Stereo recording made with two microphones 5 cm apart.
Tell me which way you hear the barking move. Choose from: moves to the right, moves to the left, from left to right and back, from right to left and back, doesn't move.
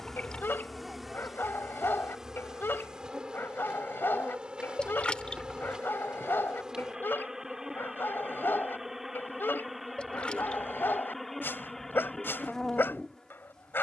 doesn't move.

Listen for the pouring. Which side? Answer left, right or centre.
left.